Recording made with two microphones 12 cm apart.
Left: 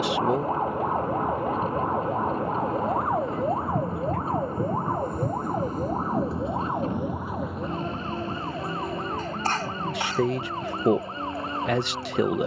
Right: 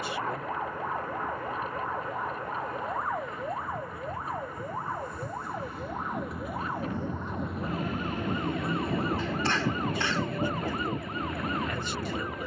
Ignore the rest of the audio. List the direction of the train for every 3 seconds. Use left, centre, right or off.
left, left, centre, right.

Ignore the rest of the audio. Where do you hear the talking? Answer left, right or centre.
left.